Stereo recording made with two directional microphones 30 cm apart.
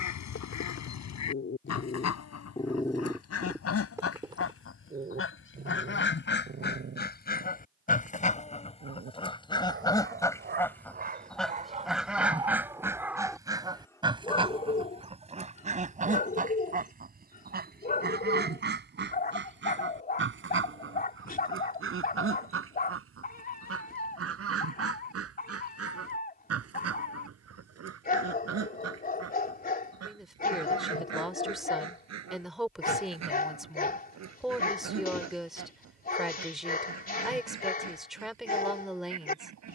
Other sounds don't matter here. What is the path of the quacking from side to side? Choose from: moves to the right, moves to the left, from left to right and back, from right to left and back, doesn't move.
moves to the right.